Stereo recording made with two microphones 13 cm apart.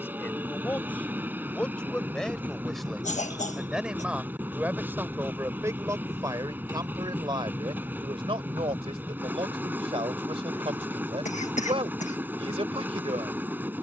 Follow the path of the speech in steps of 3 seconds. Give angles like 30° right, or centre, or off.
10° left, 10° right, 40° right, 50° right, 50° right.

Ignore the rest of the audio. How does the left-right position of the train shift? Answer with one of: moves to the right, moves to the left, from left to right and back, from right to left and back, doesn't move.
doesn't move.